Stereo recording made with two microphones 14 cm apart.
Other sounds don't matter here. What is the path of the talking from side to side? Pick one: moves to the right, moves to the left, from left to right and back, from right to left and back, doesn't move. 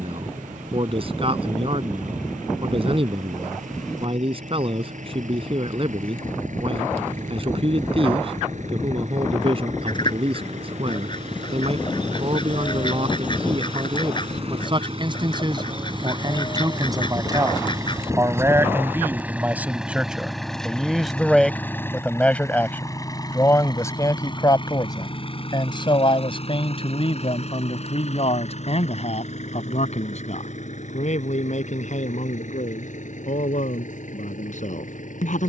moves to the left.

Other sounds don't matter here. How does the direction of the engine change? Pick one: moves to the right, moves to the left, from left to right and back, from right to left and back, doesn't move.
moves to the left.